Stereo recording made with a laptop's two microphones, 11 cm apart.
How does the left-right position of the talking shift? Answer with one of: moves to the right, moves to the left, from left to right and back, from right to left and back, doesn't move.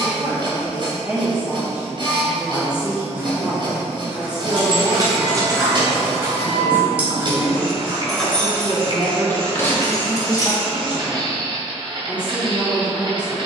doesn't move.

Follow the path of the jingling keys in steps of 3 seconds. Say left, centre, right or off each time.
off, right, centre, left, off.